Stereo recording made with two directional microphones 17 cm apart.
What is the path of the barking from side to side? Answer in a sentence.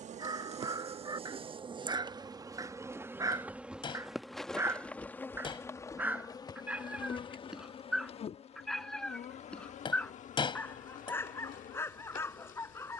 You can hear the barking move to the left.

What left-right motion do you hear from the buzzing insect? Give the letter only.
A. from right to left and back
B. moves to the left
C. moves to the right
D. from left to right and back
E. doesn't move
B.